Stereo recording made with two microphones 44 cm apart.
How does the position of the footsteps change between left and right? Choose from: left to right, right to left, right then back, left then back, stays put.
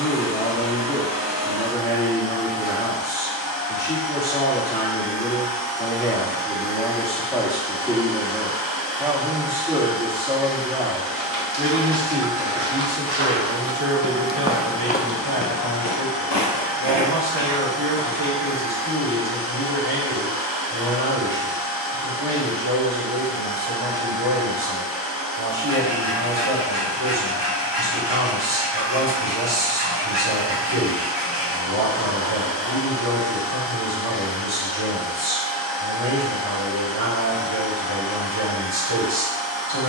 right to left.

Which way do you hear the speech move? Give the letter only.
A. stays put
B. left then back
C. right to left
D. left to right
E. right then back
D.